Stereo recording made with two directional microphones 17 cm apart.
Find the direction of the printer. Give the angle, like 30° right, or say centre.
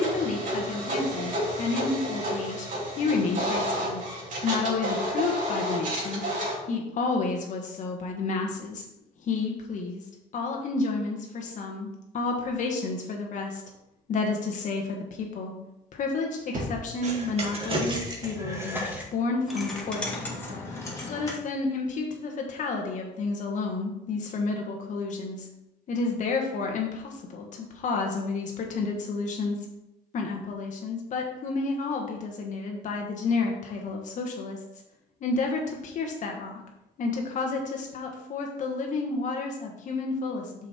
50° right.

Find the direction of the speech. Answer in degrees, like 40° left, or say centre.
50° left.